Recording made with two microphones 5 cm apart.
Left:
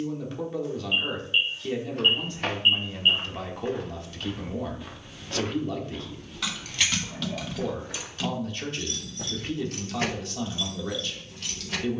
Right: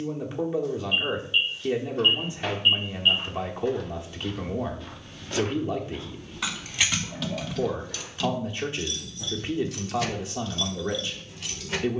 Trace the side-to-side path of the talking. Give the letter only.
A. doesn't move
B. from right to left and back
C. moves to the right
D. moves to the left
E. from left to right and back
A.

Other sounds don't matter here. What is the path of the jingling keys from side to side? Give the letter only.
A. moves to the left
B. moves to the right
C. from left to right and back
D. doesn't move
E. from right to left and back
E.